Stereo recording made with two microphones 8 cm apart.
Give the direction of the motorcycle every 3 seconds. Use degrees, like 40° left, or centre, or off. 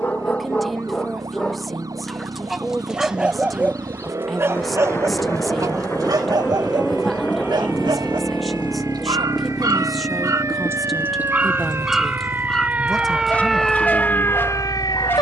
50° right, 40° right, centre, 50° left, 70° left.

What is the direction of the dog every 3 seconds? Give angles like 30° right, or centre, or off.
10° left, 30° right, 60° right, 40° right, 20° left.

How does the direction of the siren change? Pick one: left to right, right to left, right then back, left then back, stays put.
right to left.